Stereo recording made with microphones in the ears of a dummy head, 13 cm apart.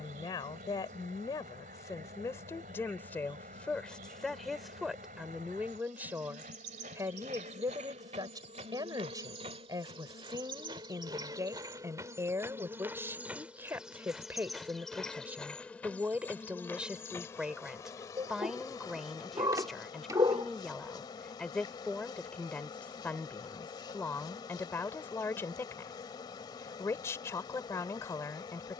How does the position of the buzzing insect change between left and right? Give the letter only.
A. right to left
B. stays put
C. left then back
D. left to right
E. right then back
A.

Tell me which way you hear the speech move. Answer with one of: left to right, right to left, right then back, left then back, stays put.
right then back.